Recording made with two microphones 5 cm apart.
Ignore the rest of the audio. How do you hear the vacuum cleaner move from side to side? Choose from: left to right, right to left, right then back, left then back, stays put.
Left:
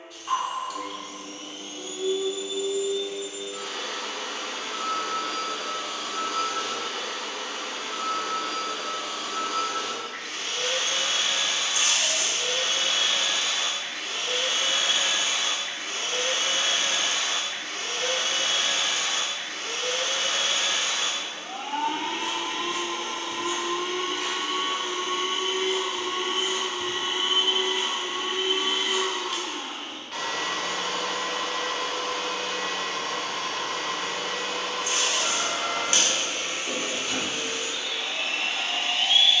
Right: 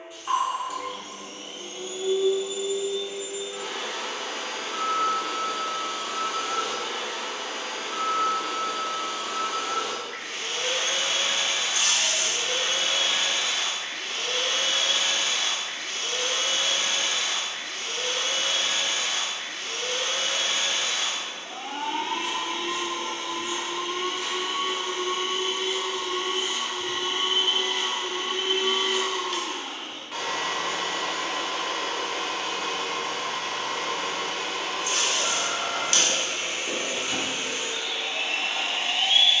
left then back.